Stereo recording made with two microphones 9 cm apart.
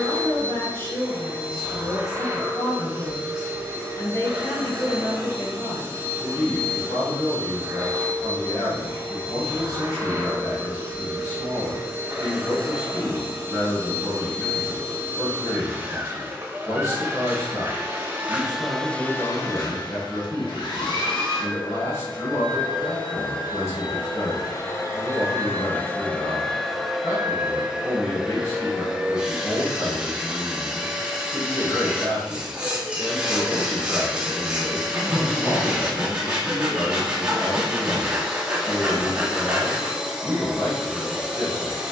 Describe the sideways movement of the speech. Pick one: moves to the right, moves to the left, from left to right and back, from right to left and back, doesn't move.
doesn't move.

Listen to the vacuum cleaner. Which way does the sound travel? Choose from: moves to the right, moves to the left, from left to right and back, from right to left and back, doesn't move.
from right to left and back.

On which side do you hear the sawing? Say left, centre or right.
centre.